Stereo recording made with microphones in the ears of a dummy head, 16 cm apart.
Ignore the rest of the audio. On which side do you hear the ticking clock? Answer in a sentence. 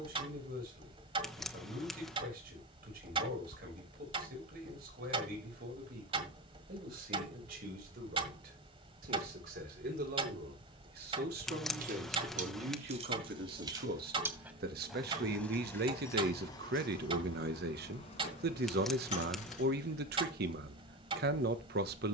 In this clip you hear the ticking clock on the right.